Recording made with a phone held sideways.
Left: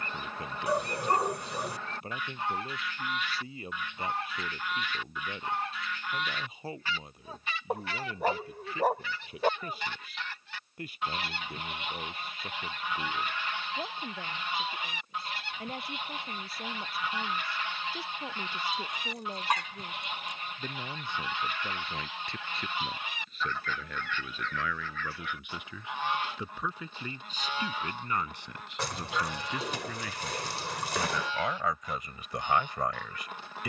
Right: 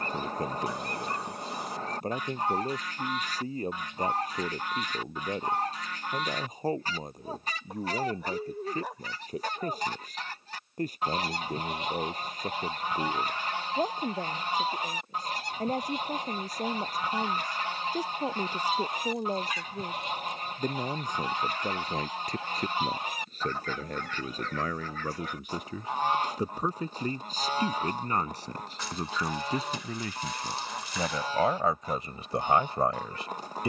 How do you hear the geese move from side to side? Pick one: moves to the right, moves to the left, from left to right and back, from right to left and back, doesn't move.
doesn't move.